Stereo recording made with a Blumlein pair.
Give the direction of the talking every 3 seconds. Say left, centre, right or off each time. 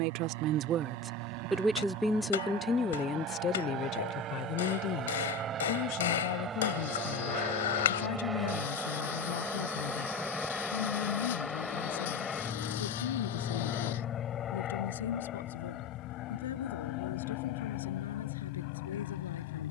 centre, left, left, left, left, left, left.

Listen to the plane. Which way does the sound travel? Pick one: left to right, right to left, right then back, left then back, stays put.
right to left.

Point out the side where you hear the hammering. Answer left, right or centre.
left.